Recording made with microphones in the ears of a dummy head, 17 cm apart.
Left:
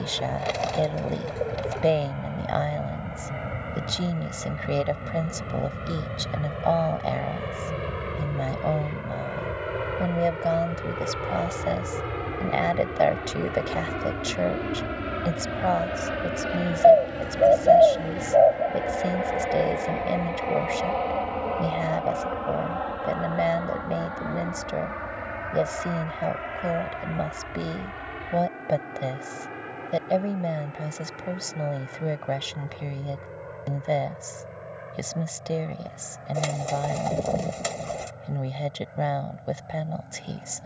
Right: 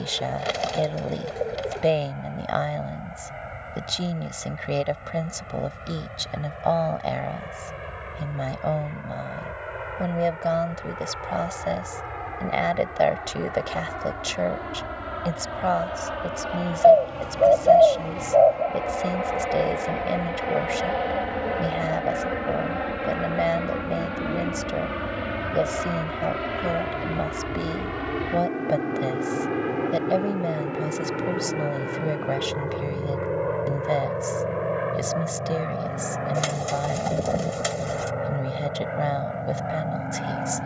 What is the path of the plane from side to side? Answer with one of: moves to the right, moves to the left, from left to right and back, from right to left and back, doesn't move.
moves to the right.